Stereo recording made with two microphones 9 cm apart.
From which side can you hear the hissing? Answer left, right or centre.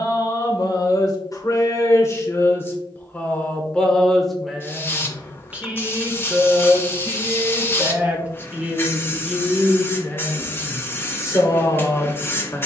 left.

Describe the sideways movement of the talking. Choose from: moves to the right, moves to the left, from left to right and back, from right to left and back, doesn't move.
from left to right and back.